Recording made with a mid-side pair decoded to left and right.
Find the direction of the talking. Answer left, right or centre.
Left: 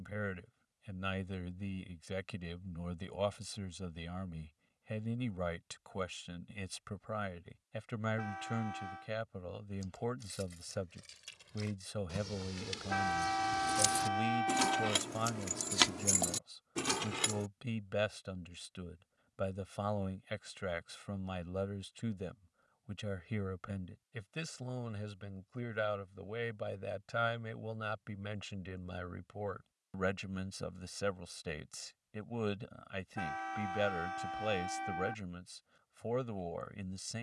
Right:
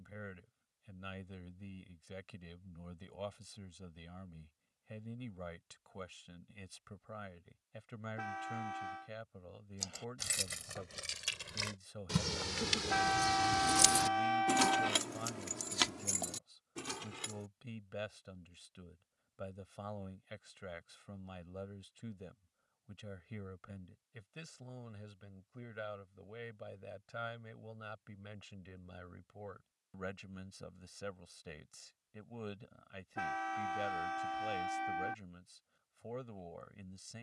left.